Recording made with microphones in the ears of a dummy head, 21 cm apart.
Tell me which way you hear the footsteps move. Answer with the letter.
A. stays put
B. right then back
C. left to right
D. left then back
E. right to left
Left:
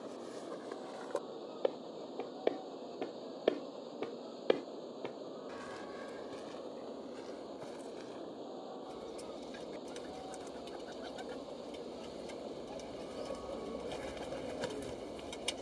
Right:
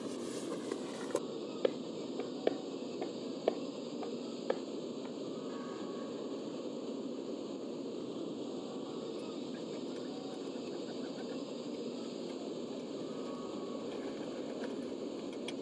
E.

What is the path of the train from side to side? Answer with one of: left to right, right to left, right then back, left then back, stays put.
stays put.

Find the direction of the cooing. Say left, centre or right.
left.